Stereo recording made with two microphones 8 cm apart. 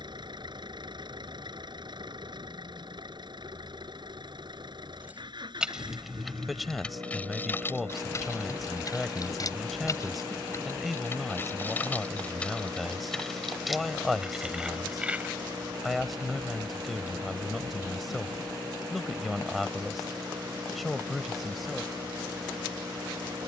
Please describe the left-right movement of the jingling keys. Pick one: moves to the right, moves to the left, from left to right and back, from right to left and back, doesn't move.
from right to left and back.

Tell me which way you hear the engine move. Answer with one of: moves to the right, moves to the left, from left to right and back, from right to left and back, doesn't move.
doesn't move.